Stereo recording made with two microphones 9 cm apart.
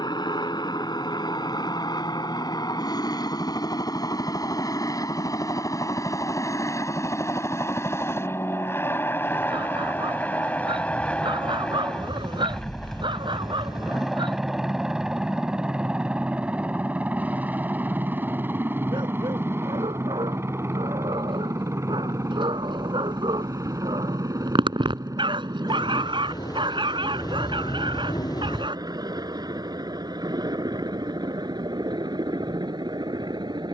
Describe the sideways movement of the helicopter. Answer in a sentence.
In this clip you hear the helicopter go from the left side to the right.